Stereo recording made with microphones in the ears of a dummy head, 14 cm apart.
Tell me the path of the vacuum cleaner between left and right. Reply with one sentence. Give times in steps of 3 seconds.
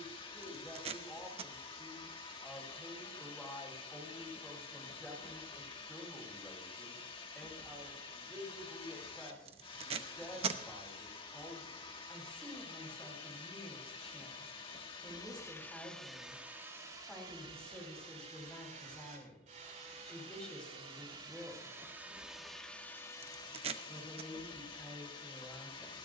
In this clip you hear the vacuum cleaner on the left from 0 s, in the centre from 15 s, on the right from 18 s, in the centre from 21 s and on the left from 24 s.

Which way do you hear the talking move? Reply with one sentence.
You can hear the talking stay in one place.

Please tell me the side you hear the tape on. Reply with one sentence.
You can hear the tape on the right.